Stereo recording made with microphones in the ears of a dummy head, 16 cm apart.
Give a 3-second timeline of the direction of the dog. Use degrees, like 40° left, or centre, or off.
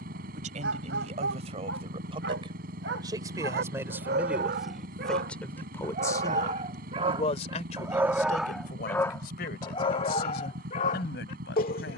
70° right, 60° right, 20° right, 40° left.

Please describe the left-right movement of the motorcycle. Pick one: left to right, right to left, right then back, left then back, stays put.
stays put.